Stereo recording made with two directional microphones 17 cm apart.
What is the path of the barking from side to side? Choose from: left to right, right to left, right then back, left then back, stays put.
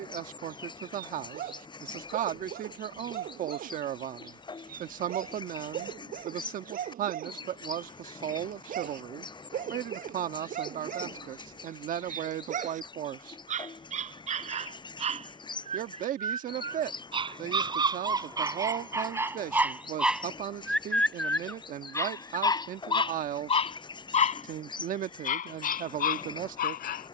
right to left.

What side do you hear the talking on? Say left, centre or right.
right.